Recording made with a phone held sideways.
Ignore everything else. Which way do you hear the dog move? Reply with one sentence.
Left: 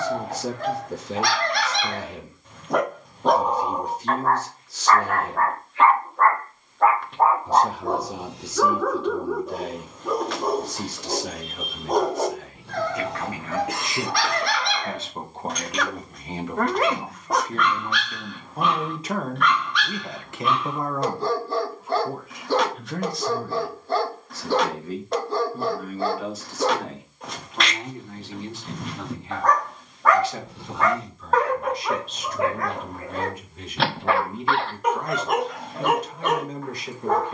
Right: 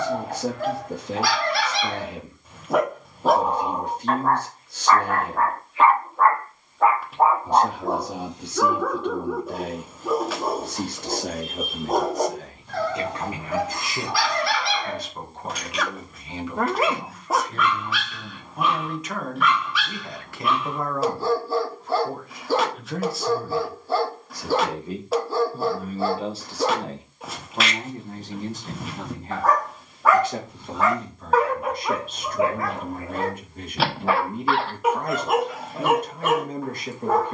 In this clip you hear the dog stay put.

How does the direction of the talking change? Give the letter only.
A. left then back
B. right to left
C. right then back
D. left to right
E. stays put
A.